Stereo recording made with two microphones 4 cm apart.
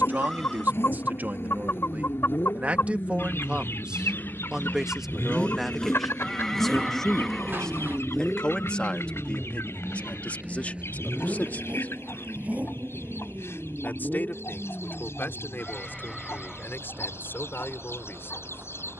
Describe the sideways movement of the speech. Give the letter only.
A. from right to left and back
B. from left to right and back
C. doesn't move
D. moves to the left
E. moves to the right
D.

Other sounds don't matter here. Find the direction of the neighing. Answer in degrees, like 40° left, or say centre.
10° left.